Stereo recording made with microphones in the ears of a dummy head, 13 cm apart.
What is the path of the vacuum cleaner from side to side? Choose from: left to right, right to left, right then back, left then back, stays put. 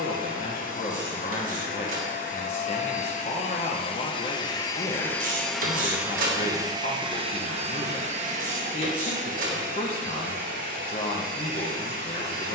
left to right.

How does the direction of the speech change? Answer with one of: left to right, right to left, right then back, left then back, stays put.
stays put.